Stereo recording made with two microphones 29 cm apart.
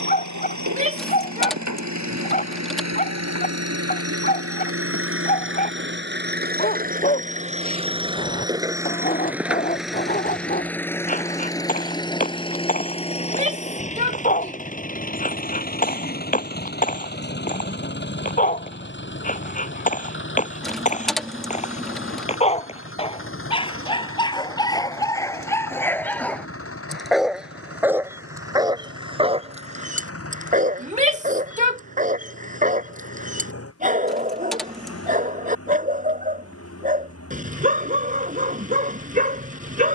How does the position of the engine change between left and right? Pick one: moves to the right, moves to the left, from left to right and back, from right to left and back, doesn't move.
moves to the left.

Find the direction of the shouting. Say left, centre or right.
right.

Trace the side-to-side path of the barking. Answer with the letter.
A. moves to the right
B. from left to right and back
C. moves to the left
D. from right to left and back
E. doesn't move
A.